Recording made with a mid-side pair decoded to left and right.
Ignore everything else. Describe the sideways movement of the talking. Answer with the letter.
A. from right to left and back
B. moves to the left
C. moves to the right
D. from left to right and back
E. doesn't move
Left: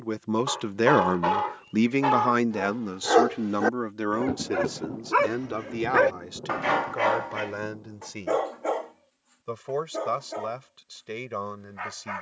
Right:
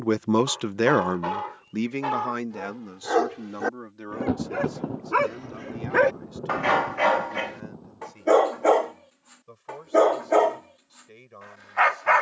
B.